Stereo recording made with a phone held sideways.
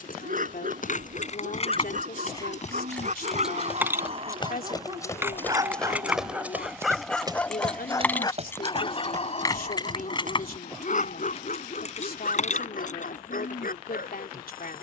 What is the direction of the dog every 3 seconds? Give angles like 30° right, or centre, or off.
60° right, 40° right, 10° left, 50° left, 70° left.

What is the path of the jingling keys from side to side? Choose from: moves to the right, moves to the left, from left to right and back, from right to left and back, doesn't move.
from left to right and back.